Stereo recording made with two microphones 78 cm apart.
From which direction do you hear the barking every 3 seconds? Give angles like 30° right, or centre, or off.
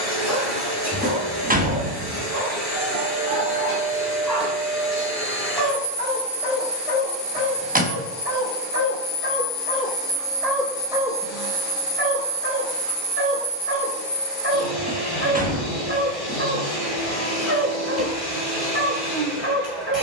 20° right, centre, 40° left, centre, 20° right, 20° right, 20° right.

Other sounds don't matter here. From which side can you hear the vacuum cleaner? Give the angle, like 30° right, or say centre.
30° left.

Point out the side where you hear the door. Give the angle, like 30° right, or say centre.
10° right.